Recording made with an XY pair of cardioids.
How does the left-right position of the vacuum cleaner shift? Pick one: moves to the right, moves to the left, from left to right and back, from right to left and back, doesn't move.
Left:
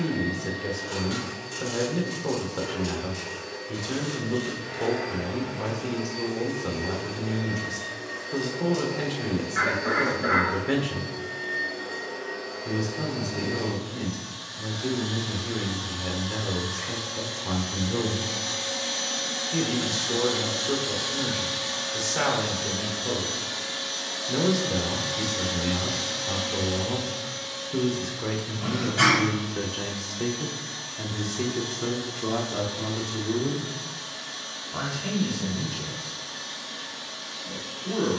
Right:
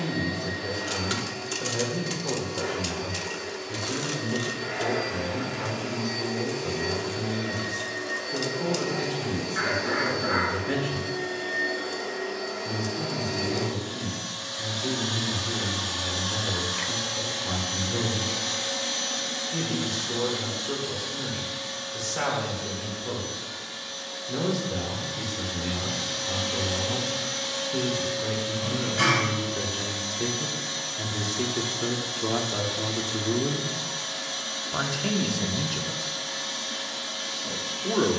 from right to left and back.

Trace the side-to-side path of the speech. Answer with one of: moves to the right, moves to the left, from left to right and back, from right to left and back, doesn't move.
moves to the right.